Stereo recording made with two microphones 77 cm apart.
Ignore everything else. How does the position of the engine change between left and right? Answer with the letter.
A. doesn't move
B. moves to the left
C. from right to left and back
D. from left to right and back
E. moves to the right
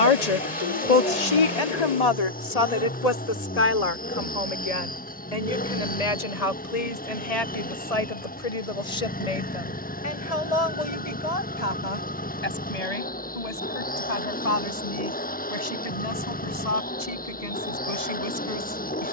A.